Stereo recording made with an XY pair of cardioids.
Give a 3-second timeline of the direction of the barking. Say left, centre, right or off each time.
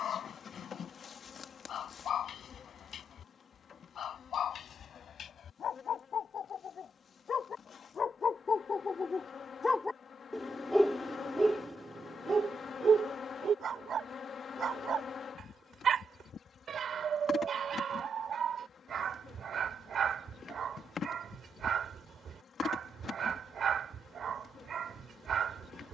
left, left, left, centre, right, right, right, right, right.